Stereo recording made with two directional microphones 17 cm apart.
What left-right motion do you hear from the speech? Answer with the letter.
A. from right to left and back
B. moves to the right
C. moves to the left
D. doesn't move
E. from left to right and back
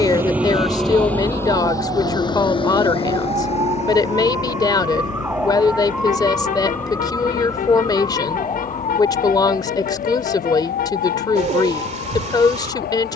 D.